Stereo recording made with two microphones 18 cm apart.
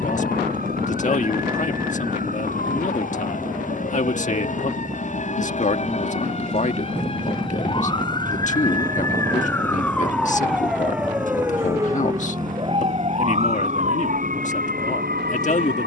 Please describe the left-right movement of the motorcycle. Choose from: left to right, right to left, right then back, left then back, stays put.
stays put.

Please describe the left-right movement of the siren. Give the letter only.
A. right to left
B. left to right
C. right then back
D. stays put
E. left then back
B.